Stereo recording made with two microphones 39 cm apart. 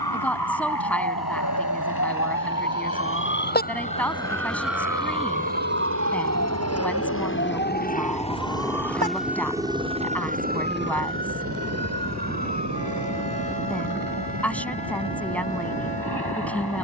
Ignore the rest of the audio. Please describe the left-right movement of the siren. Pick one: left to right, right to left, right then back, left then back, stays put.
left to right.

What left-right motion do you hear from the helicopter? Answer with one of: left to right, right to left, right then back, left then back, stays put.
left to right.